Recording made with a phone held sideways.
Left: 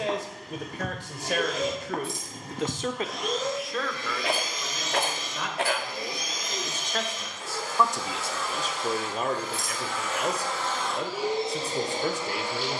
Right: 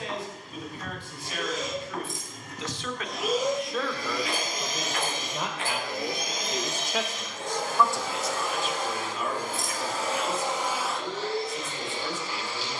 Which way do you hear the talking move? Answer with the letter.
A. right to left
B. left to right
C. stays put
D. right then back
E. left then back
D.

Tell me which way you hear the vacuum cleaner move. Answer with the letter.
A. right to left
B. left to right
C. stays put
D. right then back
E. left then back
D.